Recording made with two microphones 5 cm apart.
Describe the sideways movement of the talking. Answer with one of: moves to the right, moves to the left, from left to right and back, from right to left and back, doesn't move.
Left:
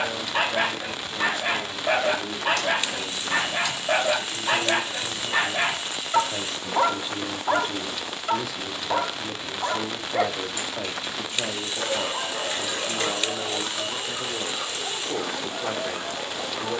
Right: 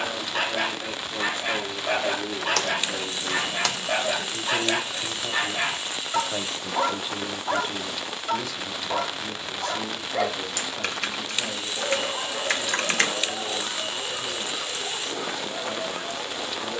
moves to the left.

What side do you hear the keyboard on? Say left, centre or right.
right.